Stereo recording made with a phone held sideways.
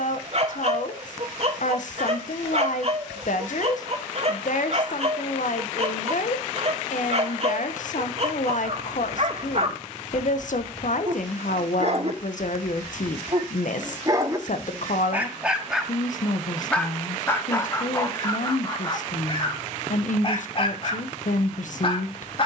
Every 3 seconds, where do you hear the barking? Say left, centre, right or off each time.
right, right, right, right, right, centre, left, left.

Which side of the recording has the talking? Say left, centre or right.
left.